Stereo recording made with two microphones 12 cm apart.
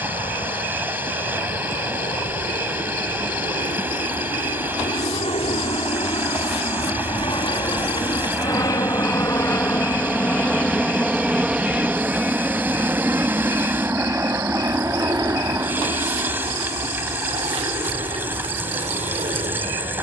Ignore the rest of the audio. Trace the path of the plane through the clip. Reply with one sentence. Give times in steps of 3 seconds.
In this clip you hear the plane on the left from 0 s, in the centre from 9 s and on the right from 12 s.